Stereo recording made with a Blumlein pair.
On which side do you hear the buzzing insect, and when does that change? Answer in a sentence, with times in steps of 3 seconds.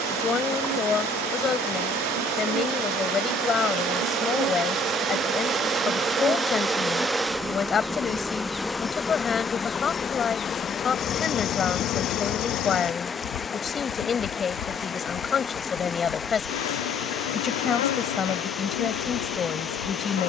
You can hear the buzzing insect on the right from 0 s, in the centre from 6 s and on the left from 9 s.